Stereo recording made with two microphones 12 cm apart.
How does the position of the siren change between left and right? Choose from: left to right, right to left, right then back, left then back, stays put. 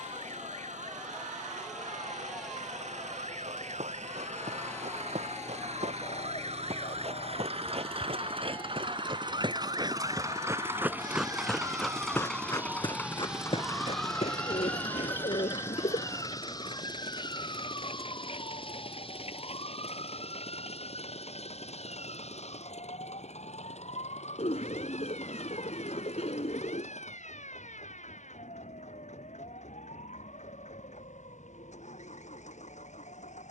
right to left.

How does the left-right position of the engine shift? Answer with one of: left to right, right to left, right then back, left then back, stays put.
right to left.